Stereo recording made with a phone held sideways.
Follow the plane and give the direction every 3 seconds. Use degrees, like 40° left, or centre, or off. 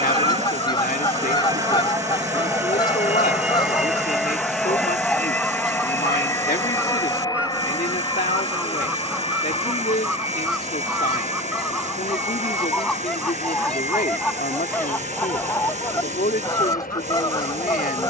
20° right, centre, 30° left, 40° left, 50° left, 60° left.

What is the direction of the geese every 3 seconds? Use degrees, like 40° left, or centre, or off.
30° left, 20° left, 10° right, centre, 10° left, 20° left.